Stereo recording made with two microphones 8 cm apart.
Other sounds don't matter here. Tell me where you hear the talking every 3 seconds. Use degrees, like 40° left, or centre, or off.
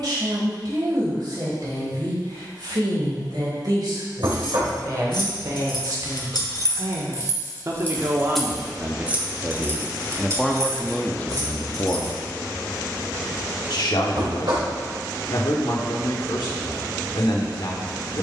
60° right, 60° right, 40° right, 10° left, 60° left, 70° left.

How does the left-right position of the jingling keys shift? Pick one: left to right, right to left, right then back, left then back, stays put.
left to right.